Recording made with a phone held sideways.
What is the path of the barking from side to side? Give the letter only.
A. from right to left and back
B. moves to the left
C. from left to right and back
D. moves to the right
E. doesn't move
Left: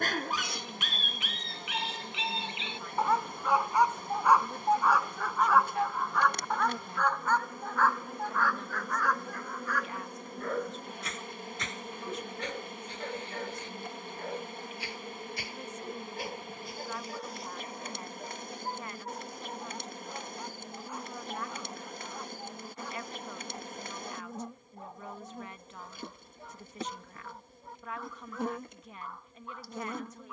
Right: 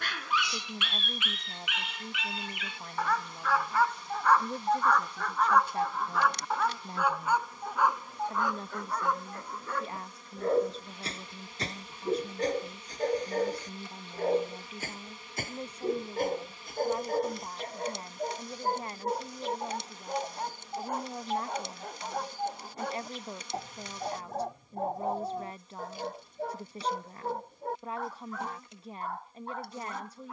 D.